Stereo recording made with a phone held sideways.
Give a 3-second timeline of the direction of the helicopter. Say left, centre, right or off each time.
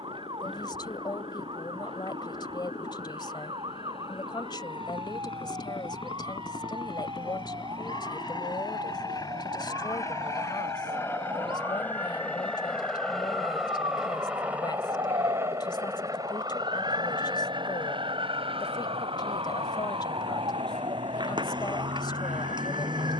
left, left, left, left, centre, right, right, right.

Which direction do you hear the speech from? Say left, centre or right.
left.